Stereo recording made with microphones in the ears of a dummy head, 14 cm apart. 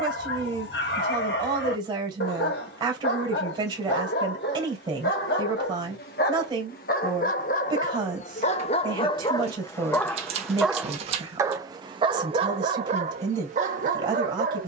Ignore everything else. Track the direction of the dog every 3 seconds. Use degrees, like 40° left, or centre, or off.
70° left, 70° left, 50° left, centre, 40° right.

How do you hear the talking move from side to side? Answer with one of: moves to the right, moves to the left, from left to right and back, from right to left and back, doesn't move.
doesn't move.